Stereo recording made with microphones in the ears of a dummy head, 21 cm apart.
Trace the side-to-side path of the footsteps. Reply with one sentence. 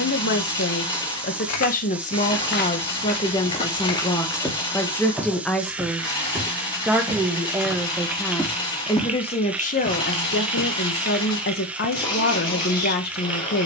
You can hear the footsteps go right and come back.